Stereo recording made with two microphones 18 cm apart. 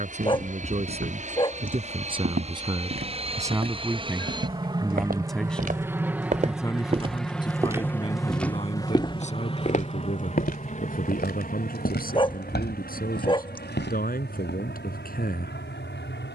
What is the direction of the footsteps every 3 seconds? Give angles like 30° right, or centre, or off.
70° right, 60° right, 20° right, 60° left, 80° left, off.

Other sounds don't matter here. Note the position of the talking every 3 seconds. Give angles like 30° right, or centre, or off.
30° right, 10° right, 30° left, 50° left, 60° left, 60° left.